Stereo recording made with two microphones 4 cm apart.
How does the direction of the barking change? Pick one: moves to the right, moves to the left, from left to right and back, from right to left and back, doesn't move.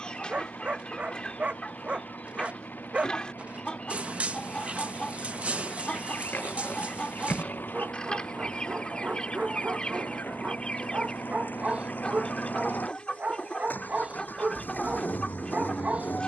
doesn't move.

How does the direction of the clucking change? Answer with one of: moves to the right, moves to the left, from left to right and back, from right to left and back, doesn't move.
doesn't move.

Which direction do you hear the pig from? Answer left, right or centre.
left.